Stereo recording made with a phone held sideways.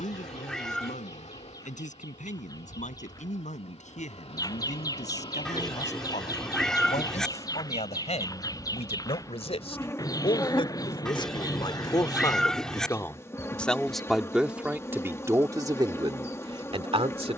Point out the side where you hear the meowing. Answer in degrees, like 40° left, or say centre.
centre.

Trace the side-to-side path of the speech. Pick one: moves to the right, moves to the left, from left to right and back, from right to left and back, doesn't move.
moves to the right.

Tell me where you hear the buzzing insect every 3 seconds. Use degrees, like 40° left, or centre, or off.
60° left, 50° left, 30° left, 20° left, 20° left, 20° left.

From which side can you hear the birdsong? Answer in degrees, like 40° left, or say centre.
30° left.